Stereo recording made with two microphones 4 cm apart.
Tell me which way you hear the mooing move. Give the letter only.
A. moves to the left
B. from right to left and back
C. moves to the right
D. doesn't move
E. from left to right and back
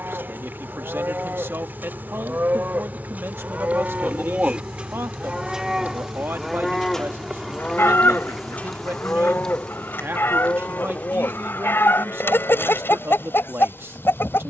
A.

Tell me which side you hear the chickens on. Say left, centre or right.
left.